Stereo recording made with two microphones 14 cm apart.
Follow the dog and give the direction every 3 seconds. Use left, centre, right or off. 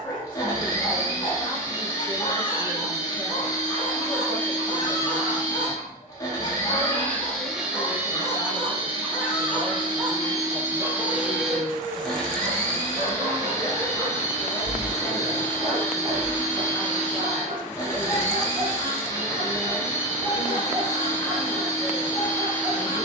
left, left, left, centre, right, right, right, right.